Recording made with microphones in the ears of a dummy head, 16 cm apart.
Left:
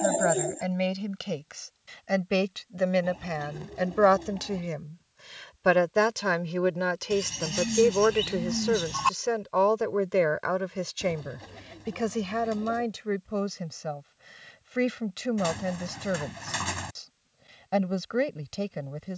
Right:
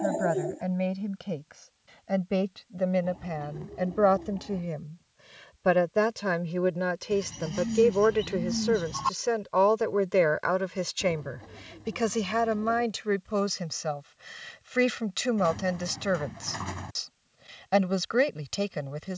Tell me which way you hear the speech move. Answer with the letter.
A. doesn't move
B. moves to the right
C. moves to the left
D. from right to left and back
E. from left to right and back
B.